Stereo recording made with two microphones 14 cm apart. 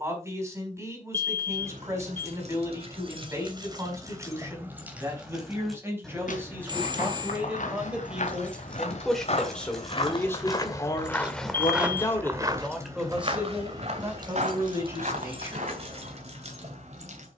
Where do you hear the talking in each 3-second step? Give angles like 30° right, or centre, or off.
20° right, 20° right, 10° right, 20° left, 10° right, 20° right.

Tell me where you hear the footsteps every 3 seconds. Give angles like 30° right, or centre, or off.
off, off, 60° left, 30° left, 40° right, 60° right.